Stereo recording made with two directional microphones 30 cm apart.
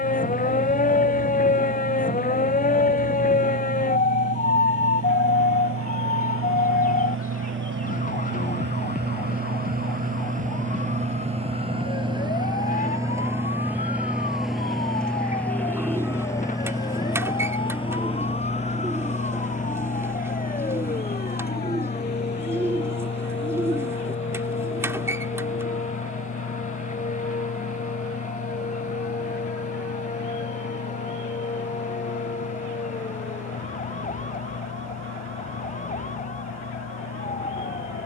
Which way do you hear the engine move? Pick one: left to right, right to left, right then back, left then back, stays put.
right to left.